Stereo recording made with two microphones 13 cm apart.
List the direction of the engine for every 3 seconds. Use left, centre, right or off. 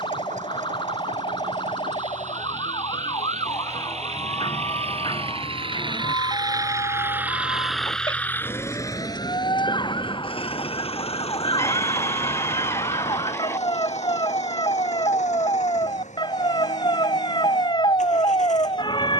right, right, centre, left, left, left, left.